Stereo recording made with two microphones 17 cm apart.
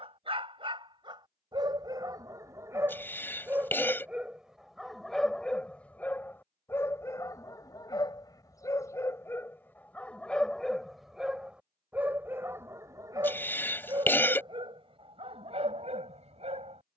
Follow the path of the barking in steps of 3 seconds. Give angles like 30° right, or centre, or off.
30° right, centre, 20° left, centre, 20° right, 40° right.